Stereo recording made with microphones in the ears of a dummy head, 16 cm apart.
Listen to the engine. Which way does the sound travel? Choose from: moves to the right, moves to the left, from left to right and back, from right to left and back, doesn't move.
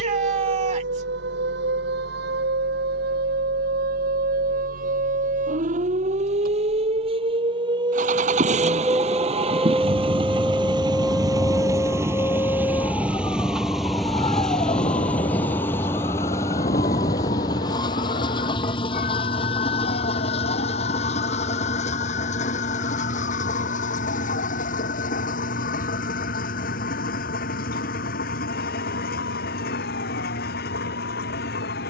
moves to the left.